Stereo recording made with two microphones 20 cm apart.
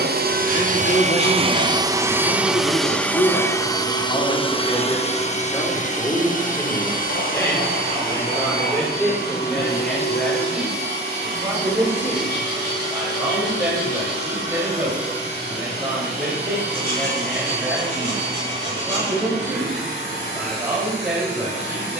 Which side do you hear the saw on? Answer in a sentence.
You can hear the saw on the left.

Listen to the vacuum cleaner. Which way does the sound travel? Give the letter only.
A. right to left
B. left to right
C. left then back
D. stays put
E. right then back
A.